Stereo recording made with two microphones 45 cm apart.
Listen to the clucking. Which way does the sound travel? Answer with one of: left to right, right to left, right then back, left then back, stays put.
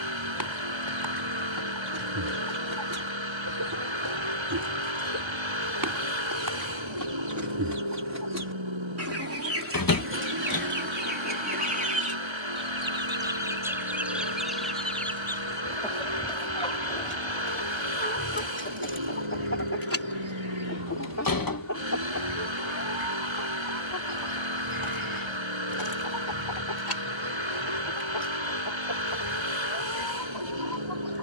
right to left.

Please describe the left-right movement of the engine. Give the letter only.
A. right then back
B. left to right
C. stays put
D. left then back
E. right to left
C.